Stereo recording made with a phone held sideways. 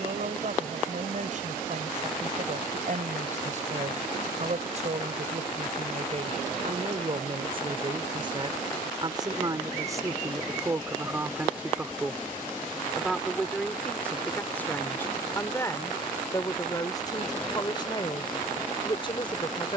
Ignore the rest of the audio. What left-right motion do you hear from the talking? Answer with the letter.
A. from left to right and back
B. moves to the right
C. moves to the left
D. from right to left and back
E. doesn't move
C.